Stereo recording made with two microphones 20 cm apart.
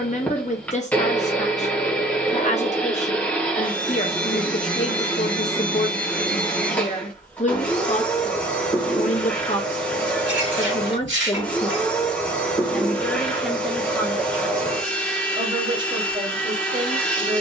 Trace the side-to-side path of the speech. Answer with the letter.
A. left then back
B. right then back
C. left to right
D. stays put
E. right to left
C.